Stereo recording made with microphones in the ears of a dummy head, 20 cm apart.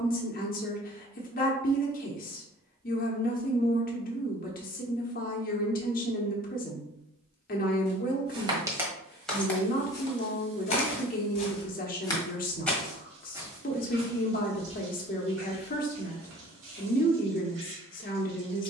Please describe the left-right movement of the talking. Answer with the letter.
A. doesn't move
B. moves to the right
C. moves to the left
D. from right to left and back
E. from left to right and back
A.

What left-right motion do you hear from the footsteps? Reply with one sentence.
In this clip you hear the footsteps move from right to left and back again.